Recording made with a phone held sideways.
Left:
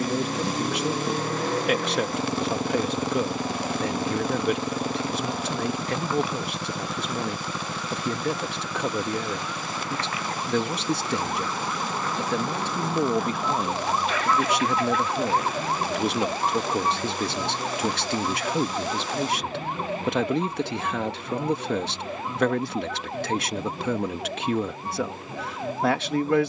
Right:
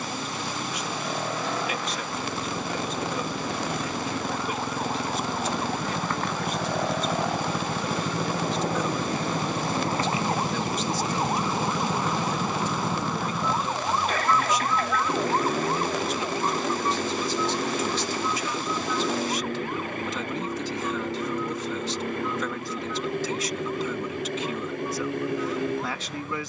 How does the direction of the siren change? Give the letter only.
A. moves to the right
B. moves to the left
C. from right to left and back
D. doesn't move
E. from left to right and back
B.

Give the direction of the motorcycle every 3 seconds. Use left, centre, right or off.
left, left, centre, right, right, right, right, right, right.